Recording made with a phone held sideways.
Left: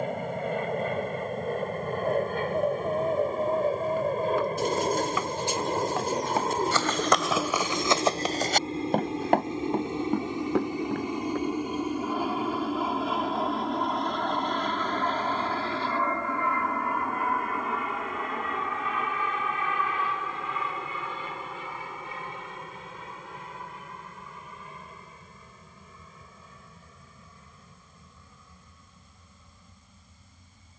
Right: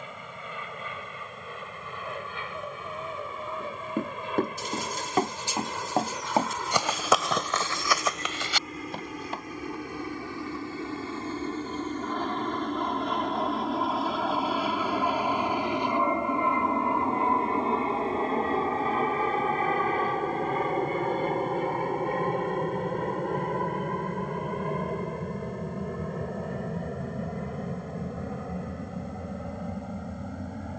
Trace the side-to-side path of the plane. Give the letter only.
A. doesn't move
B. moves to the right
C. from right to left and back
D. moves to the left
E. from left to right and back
B.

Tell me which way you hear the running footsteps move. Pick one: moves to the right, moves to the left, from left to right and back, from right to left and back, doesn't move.
moves to the left.